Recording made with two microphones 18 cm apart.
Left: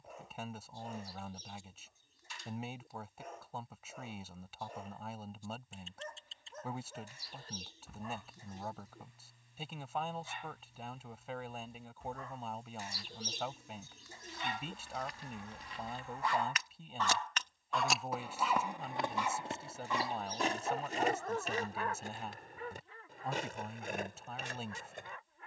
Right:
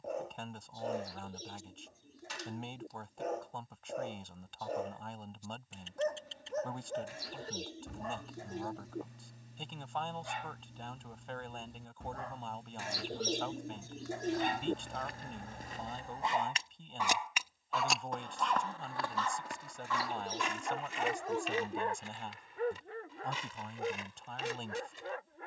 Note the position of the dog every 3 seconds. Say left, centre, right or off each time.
right, right, right, right, right, right, centre, right, right.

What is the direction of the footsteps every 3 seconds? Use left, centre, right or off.
off, off, off, off, right, right, left, left, left.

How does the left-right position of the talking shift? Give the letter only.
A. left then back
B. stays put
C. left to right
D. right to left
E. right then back
B.